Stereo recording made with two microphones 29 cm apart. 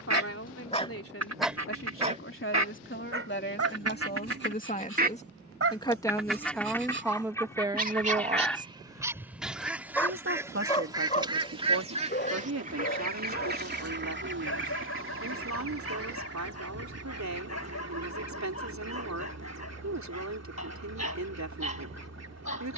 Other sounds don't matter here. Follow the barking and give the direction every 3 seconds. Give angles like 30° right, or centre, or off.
centre, 50° right, 30° right, 10° left, 50° left, 60° left, 60° left, 60° left.